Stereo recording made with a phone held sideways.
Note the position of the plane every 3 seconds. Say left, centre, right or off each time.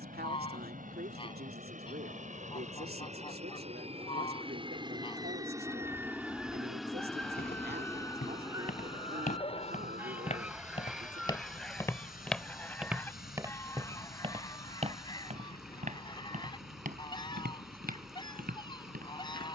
right, right, centre, left, left, left, left.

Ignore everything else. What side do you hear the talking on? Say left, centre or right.
right.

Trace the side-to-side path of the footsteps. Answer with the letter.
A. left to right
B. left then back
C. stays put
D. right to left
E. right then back
A.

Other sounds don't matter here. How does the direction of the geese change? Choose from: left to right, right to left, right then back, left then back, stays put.
right then back.